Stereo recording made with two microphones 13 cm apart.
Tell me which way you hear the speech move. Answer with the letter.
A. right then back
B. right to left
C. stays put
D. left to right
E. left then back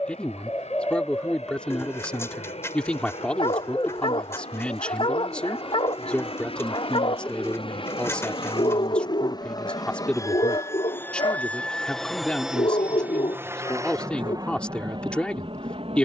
C.